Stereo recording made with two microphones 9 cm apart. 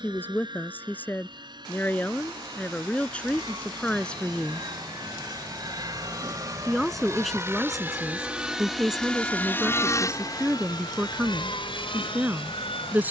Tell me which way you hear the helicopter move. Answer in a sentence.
You can hear the helicopter move to the left.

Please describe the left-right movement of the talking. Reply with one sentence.
You can hear the talking go from the left side to the right.